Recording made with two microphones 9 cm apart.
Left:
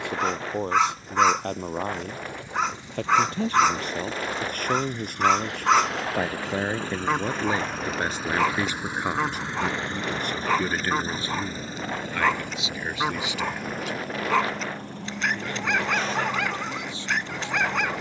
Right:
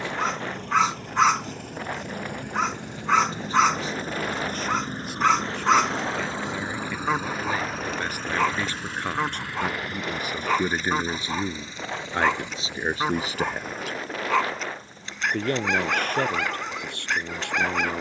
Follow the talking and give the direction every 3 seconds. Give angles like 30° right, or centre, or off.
60° left, 60° left, 30° left, 10° right, 40° right, 60° right.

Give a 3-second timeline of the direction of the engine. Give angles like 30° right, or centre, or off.
60° right, 40° right, 10° right, 30° left, 50° left, 60° left.